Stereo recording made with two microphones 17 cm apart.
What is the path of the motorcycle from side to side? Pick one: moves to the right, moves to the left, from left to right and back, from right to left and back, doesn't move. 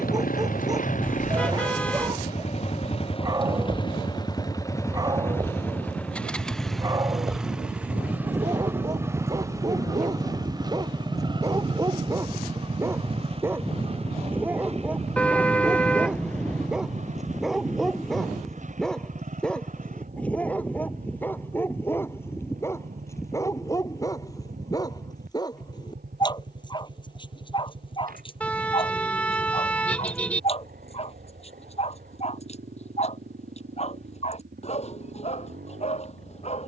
moves to the right.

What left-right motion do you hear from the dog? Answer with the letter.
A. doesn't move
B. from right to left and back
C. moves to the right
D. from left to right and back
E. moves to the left
E.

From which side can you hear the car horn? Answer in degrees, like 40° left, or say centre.
10° left.